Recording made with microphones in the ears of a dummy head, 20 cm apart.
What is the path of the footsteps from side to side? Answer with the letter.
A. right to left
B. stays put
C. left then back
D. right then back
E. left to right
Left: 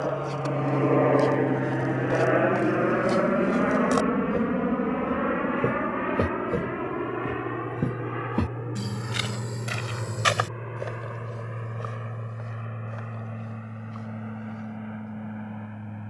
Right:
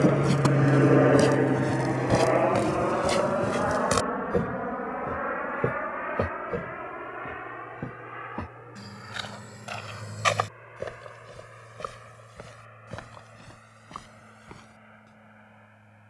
C.